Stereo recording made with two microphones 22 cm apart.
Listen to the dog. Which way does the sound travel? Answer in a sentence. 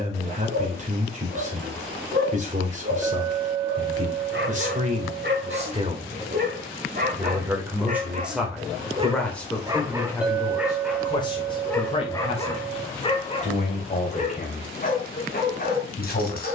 You can hear the dog go from the right side to the left.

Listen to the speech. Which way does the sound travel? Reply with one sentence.
You can hear the speech go from the right side to the left.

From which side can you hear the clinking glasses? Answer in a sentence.
You can hear the clinking glasses in the centre.